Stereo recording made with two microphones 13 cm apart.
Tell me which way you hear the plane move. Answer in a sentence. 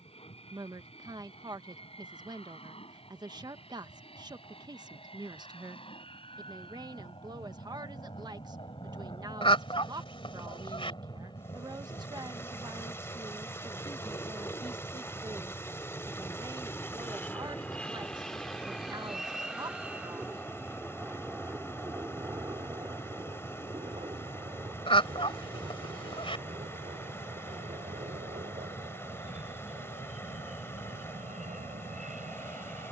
You can hear the plane go from the left side to the right.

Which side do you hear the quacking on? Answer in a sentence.
In this clip you hear the quacking on the left.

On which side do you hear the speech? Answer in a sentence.
You can hear the speech on the right.